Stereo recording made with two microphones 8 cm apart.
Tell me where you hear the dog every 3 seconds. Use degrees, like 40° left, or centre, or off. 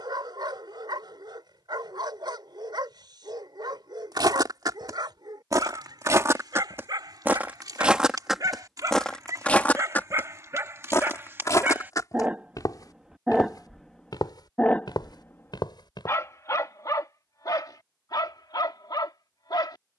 60° right, 60° right, 50° right, 40° right, centre, 40° left, 60° left.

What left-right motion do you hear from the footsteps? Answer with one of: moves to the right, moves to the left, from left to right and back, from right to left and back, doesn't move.
moves to the left.